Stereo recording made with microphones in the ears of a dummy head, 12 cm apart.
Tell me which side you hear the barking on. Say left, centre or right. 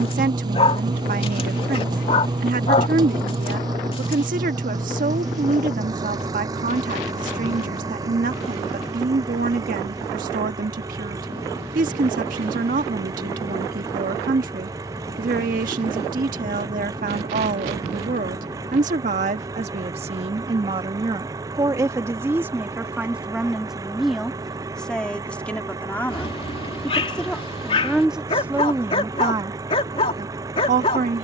left.